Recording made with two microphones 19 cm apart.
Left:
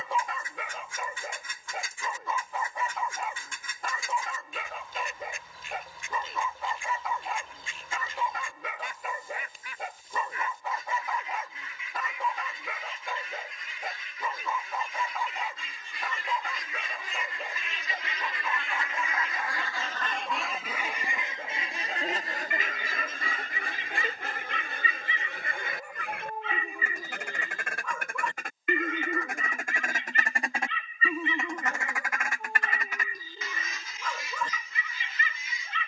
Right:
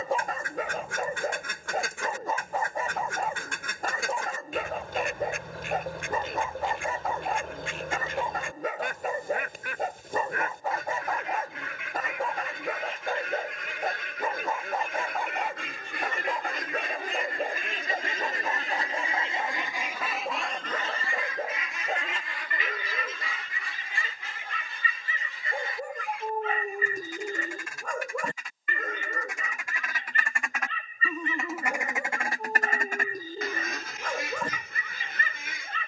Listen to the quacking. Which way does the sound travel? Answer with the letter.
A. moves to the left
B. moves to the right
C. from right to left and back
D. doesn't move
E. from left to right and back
C.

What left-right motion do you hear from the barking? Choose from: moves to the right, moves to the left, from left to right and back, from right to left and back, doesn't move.
doesn't move.